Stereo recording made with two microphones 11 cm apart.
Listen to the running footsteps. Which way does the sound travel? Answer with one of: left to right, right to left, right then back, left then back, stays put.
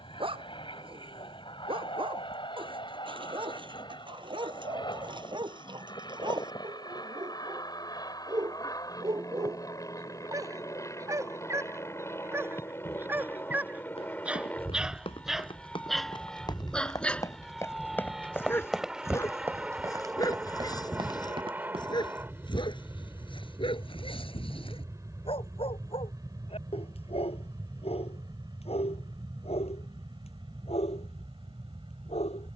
left to right.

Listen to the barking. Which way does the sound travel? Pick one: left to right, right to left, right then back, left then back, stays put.
right to left.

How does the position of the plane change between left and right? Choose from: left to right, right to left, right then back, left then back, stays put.
left to right.